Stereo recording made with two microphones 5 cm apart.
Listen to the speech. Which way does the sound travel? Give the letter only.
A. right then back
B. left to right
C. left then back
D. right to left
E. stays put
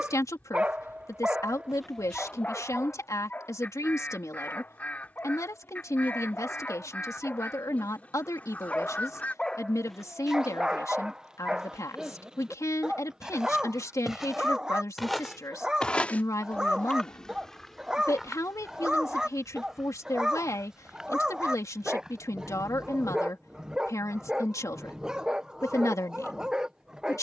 E.